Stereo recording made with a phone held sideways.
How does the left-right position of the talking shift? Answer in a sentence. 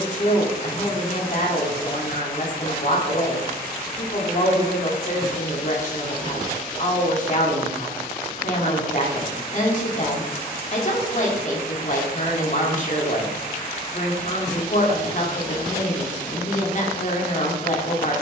You can hear the talking stay in one place.